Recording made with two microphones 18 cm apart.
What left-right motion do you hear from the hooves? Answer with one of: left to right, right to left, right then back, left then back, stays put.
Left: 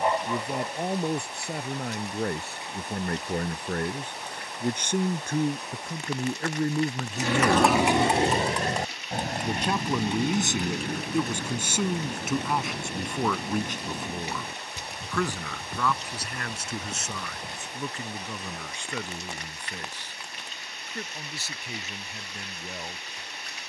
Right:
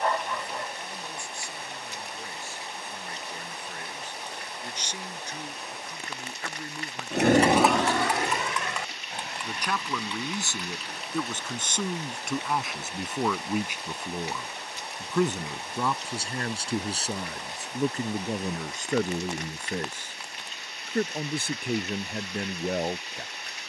right to left.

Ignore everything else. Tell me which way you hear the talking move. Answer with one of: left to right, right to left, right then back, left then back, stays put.
left to right.